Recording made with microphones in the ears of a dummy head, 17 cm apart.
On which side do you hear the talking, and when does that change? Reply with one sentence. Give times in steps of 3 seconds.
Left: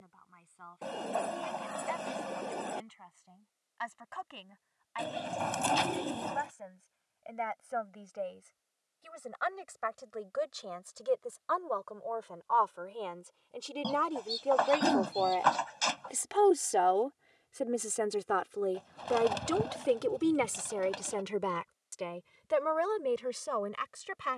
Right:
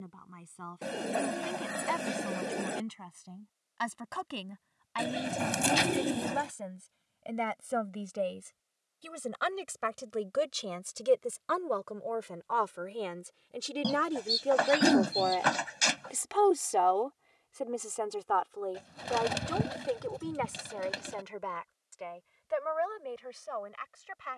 In this clip you hear the talking on the right from 0 s, in the centre from 15 s and on the left from 18 s.